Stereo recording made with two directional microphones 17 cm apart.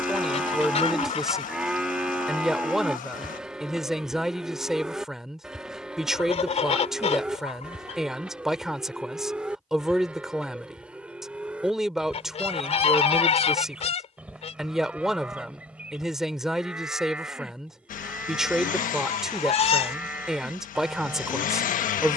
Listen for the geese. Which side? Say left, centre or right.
left.